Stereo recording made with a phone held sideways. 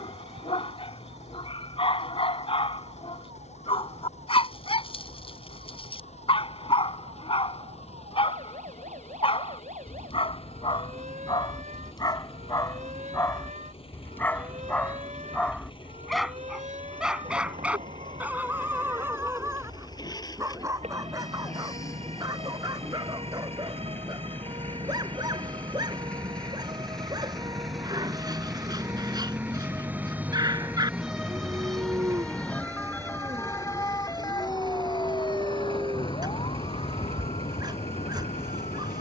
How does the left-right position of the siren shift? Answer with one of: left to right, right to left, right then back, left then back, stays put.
right to left.